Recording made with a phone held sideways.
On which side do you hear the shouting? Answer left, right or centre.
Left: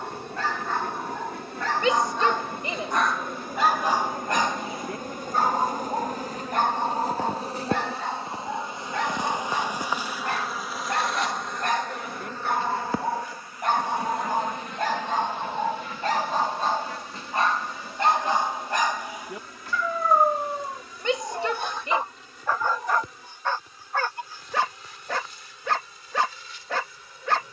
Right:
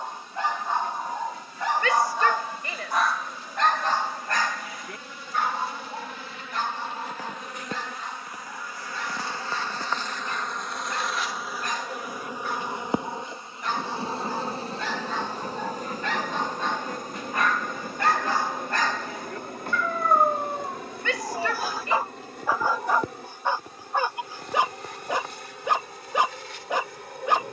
left.